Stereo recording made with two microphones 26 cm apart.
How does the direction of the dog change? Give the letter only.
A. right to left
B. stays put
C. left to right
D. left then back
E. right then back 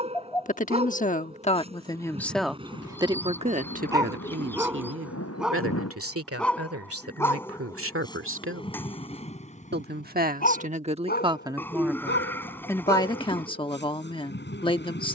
A.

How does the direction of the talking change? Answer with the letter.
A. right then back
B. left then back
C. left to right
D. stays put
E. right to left
A.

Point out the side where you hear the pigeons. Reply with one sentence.
You can hear the pigeons in the centre.